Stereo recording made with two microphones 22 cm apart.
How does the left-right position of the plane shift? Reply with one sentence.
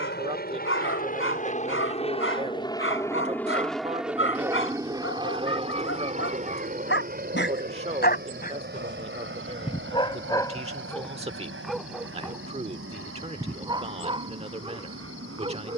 You can hear the plane go from the left side to the right.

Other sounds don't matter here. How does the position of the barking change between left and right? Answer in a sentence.
In this clip you hear the barking travel towards the right.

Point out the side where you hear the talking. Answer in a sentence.
You can hear the talking on the right.